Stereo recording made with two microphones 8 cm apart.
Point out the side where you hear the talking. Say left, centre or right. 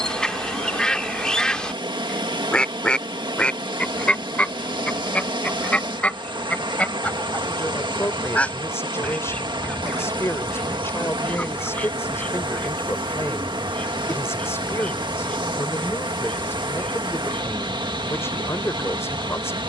left.